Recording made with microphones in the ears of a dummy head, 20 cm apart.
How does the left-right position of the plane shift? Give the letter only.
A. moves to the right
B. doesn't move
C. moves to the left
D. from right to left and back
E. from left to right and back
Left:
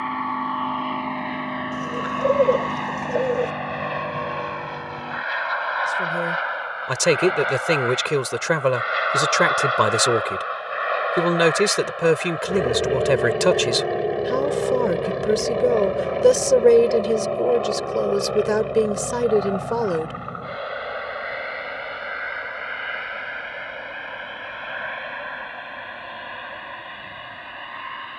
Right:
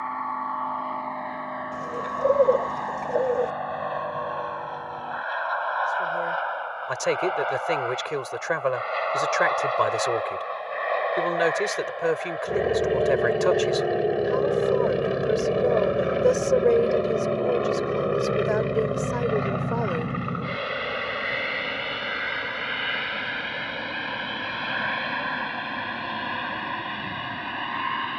A.